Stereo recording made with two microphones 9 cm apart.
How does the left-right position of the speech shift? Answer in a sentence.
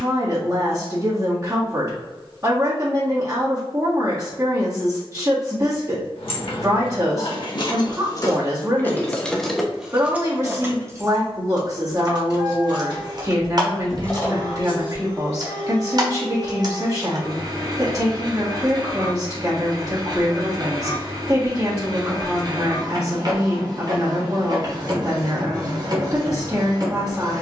You can hear the speech stay put.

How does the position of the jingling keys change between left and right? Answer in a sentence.
In this clip you hear the jingling keys move from left to right and back again.